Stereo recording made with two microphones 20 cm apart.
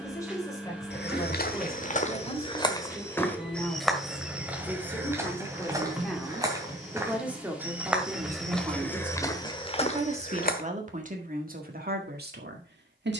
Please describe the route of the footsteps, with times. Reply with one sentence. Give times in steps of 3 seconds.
In this clip you hear the footsteps on the left from 0 s, in the centre from 3 s, on the left from 9 s and not at all from 12 s.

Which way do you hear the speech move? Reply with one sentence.
In this clip you hear the speech move to the right.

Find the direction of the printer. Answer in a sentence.
In this clip you hear the printer in the centre.